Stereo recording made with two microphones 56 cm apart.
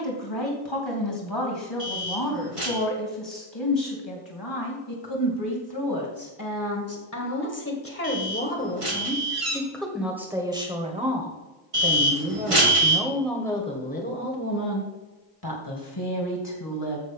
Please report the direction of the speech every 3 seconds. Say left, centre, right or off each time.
left, left, left, centre, centre, left.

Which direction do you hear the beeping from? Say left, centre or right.
right.